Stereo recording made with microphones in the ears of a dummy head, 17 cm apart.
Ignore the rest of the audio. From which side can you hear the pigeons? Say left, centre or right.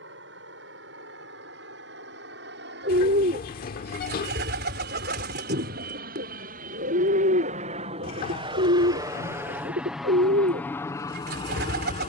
right.